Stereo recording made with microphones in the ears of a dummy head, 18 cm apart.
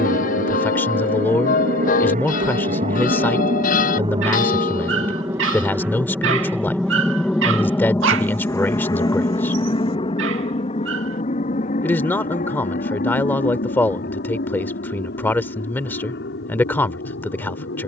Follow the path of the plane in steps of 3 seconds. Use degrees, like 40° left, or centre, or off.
40° right, 20° right, 10° left, 30° left, 40° left, 50° left.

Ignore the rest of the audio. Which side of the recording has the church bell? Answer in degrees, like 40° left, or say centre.
40° left.